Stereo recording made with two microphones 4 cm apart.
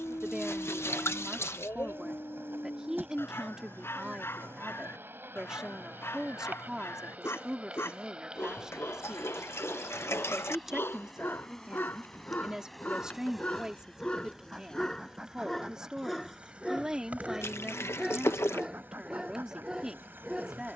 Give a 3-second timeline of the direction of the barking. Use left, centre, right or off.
left, left, left, left, left, centre, centre.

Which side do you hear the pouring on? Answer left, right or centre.
left.